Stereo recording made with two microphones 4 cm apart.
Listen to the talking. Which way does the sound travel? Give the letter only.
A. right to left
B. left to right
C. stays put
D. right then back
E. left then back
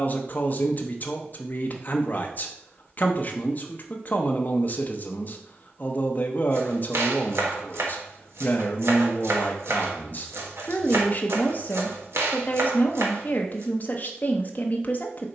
C.